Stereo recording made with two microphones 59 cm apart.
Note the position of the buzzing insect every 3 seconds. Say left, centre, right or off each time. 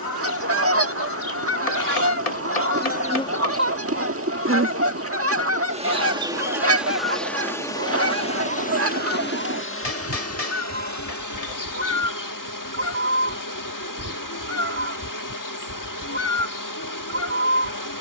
left, centre, centre, left, left, left.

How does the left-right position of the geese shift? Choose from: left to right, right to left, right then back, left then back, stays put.
stays put.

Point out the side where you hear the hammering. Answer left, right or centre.
left.